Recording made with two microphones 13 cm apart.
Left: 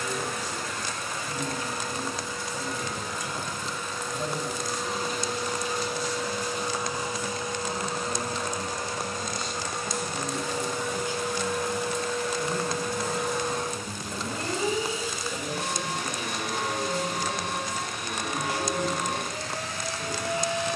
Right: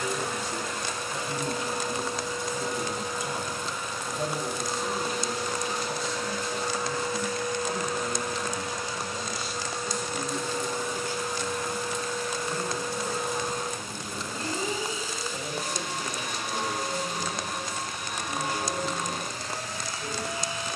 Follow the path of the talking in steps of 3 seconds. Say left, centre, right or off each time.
right, right, right, centre, left, left, left.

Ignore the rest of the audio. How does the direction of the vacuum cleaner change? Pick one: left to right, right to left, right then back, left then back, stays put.
right to left.